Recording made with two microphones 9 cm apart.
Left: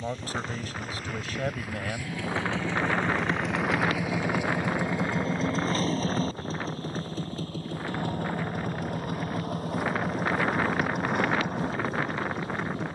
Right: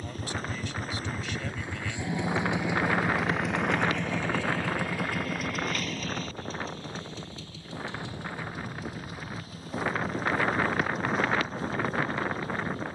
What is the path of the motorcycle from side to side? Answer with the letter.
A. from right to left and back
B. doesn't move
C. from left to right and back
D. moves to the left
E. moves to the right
D.